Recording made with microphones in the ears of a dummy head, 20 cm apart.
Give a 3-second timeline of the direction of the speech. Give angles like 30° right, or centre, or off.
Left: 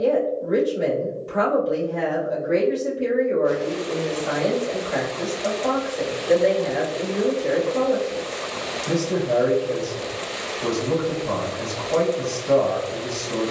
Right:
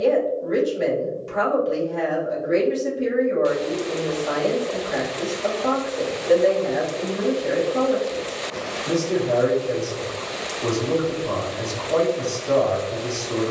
30° right, centre, 10° right, 30° right, 30° right.